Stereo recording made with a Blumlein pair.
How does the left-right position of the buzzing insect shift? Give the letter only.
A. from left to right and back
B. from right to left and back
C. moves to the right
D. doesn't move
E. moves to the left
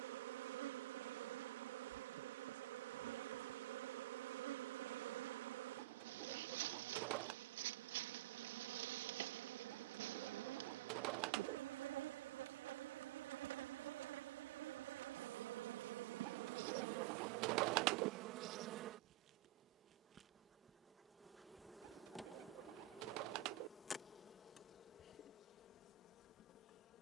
E.